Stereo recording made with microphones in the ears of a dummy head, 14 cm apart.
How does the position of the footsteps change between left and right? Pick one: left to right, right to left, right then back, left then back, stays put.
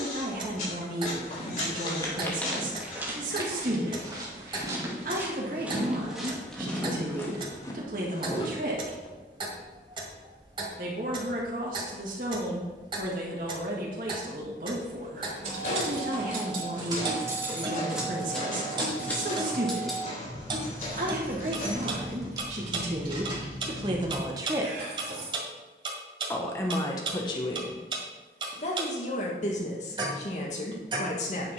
right then back.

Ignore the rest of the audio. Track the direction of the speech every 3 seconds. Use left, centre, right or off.
right, right, right, right, right, right, right, right, centre, left, left.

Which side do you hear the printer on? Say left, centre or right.
left.